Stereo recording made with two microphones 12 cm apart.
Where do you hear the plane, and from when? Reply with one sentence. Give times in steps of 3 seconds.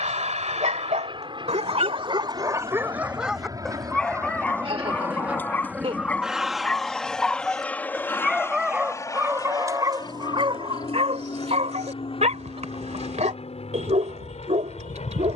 In this clip you hear the plane on the right from 0 s, in the centre from 6 s and on the left from 9 s.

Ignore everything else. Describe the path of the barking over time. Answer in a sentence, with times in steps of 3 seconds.
In this clip you hear the barking on the right from 0 s, in the centre from 3 s and on the right from 9 s.